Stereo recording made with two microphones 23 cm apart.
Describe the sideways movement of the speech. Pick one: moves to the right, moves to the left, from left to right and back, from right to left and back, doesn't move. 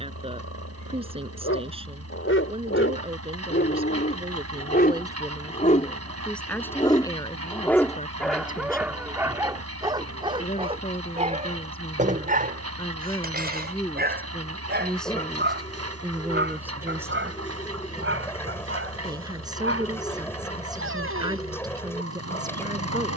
from right to left and back.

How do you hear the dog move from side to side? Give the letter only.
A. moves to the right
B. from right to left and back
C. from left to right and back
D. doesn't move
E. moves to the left
A.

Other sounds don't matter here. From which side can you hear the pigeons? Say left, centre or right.
centre.